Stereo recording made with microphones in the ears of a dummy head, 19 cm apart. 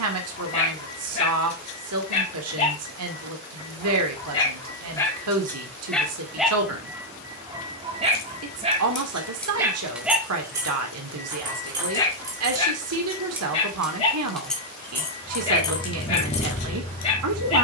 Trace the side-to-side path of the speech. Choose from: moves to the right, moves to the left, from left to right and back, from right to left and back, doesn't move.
doesn't move.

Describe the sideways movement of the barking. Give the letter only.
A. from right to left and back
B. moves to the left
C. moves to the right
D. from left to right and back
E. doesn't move
D.